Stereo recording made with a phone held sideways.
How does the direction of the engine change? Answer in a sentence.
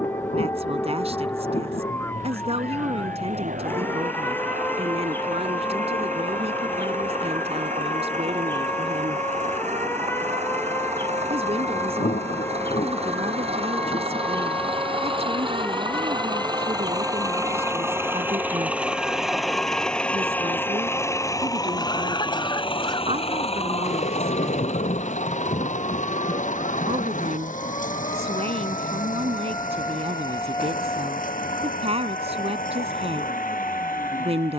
You can hear the engine move from right to left.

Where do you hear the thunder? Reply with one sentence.
You can hear the thunder on the left.